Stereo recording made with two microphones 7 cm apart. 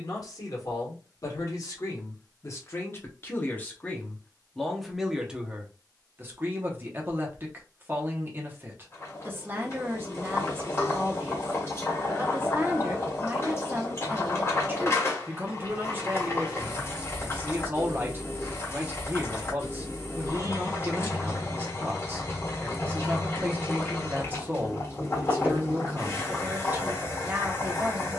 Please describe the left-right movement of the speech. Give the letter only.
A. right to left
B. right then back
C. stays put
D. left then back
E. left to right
E.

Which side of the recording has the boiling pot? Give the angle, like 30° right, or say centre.
40° left.